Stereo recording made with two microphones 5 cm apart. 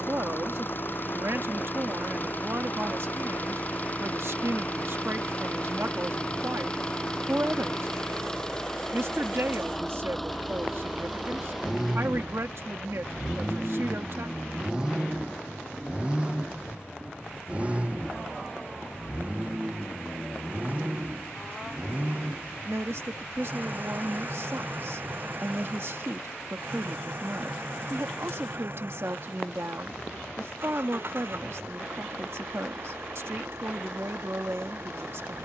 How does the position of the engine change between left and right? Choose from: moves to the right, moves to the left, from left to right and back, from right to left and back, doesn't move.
moves to the right.